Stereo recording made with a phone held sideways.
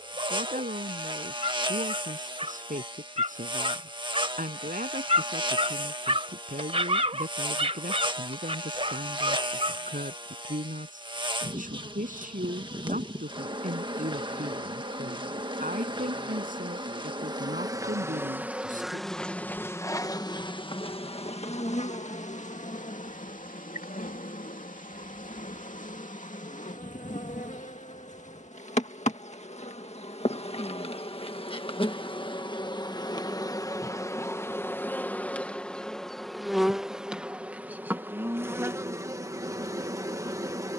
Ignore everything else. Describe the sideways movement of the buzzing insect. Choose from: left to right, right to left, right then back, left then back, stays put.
left then back.